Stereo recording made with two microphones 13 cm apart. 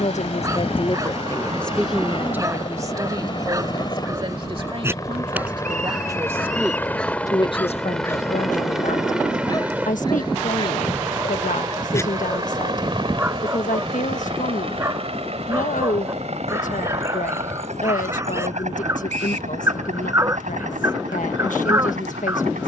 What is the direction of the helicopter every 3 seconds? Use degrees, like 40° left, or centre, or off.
40° left, 30° left, 10° left, 20° right, 40° right, 50° right, 60° right, 70° right.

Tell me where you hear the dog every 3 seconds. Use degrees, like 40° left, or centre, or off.
20° right, 20° right, 10° left, 30° left, 10° right, 20° right, 20° right, 20° right.